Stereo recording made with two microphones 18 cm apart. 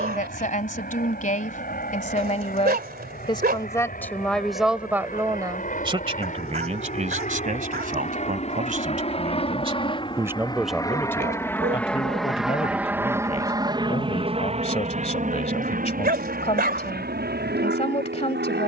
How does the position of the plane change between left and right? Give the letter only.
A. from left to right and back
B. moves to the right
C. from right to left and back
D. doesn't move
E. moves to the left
B.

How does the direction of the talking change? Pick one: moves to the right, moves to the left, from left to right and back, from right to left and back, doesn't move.
from left to right and back.